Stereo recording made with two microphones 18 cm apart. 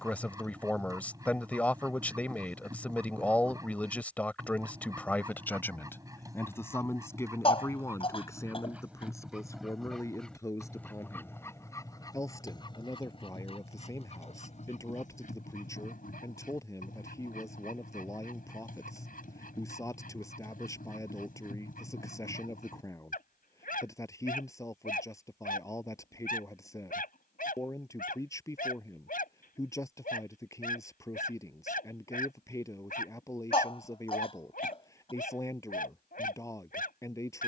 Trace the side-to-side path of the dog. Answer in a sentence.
In this clip you hear the dog move from right to left.